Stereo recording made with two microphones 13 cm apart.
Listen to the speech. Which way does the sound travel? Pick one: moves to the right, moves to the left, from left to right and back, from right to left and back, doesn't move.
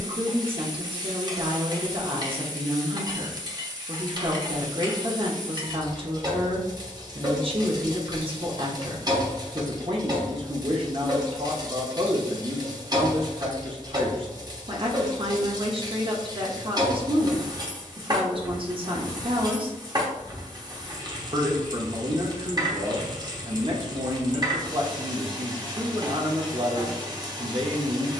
doesn't move.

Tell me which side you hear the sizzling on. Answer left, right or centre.
right.